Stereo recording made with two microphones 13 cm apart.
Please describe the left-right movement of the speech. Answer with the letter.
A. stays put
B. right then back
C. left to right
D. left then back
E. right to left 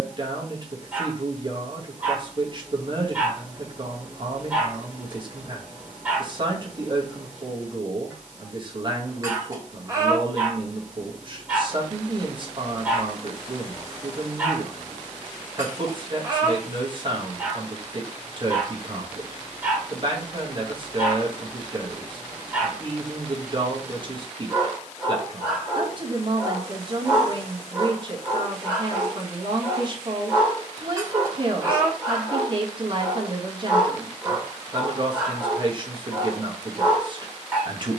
A.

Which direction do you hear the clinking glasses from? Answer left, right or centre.
right.